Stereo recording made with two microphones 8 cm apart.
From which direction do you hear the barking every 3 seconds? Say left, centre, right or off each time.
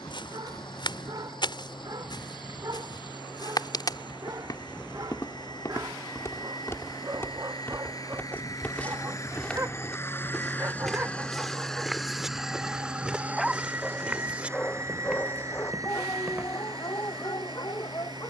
right, right, right, right, centre, left.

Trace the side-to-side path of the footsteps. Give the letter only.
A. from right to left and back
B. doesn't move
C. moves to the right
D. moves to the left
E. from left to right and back
C.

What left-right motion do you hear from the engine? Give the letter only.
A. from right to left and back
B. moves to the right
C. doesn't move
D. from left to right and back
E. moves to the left
B.